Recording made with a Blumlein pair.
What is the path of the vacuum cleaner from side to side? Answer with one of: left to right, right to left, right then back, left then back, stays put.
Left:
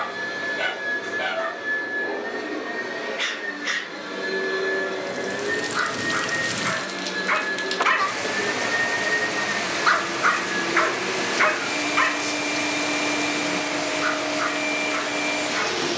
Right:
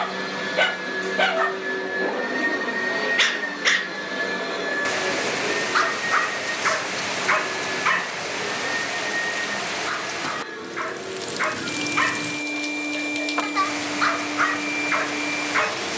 right to left.